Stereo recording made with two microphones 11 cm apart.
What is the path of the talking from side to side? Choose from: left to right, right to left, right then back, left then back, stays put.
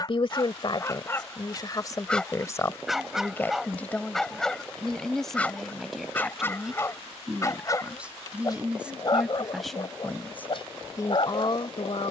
right then back.